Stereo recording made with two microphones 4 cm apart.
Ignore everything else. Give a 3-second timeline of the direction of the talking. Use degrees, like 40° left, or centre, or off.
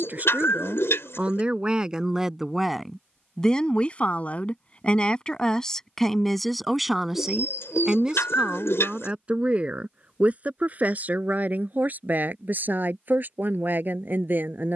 20° right, 20° left, 10° right, 40° right, 50° right.